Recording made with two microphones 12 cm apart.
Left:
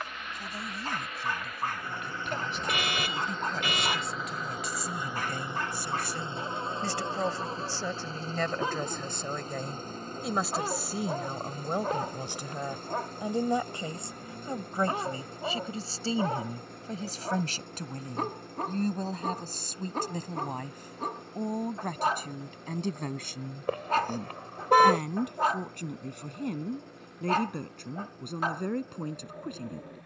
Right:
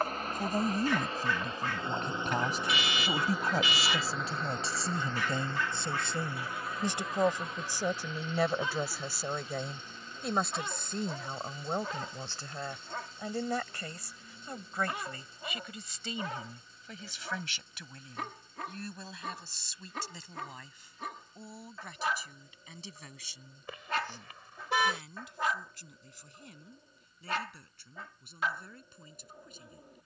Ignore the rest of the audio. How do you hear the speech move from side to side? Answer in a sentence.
In this clip you hear the speech travel towards the left.